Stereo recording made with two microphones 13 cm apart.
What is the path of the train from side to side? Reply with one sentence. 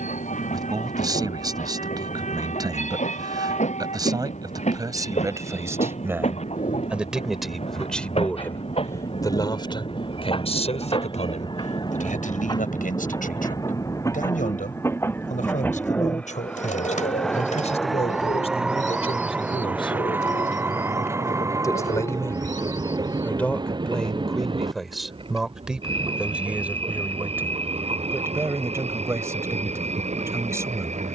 In this clip you hear the train move to the right.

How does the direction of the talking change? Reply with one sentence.
In this clip you hear the talking go left and come back.